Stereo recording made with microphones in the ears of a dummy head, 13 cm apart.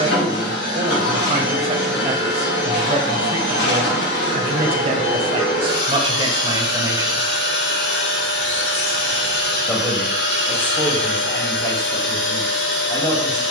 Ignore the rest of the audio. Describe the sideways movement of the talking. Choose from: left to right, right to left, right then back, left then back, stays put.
right to left.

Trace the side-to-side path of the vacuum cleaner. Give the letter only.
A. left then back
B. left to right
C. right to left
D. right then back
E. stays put
E.